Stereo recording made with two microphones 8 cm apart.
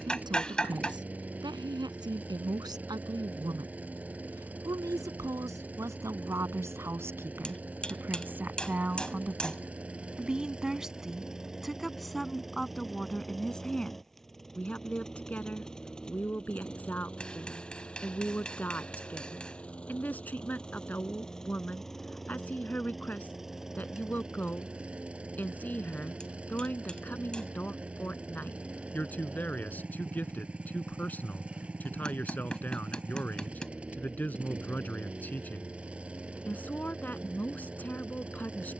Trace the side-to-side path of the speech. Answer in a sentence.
In this clip you hear the speech move from right to left.